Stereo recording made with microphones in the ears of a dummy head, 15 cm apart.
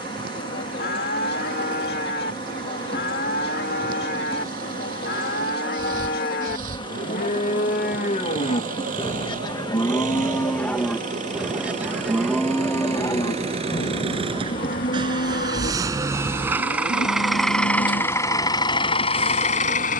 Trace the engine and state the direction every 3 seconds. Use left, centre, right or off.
right, right, right, right, right, centre, left.